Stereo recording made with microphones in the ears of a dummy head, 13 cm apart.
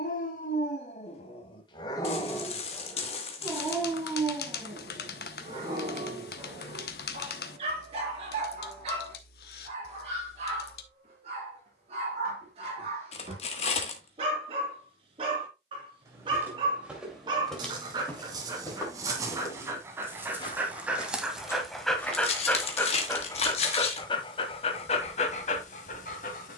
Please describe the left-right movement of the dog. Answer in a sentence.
In this clip you hear the dog go right and come back.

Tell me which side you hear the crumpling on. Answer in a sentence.
You can hear the crumpling on the left.